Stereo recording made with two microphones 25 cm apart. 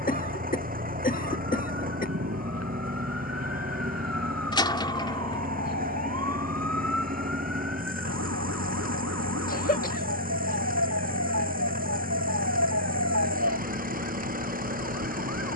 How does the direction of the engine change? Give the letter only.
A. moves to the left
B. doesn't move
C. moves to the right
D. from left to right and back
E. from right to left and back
B.